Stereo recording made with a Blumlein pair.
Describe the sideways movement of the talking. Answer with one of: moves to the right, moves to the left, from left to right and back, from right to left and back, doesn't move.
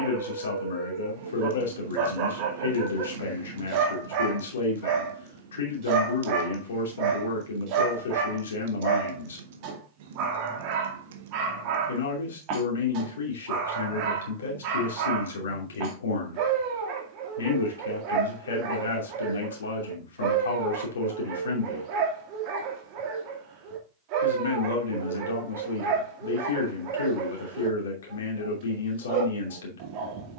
doesn't move.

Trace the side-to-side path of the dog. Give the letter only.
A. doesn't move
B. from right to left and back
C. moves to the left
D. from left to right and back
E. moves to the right
A.